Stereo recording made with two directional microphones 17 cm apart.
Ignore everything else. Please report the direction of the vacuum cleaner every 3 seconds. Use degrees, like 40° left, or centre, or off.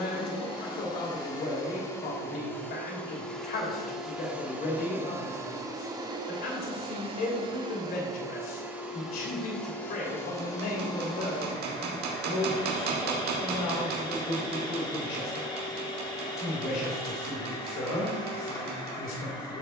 20° left, 10° right, 20° right, 20° left, 30° left, 30° left, 30° left.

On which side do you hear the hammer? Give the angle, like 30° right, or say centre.
70° right.